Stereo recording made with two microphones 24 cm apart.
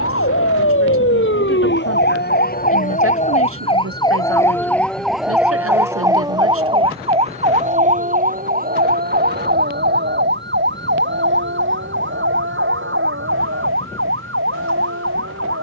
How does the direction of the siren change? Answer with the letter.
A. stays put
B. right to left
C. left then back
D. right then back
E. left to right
E.